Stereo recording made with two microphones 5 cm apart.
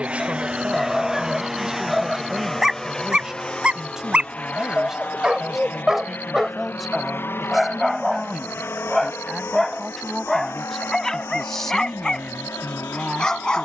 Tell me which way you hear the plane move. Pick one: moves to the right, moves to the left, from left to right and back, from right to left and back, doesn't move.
moves to the left.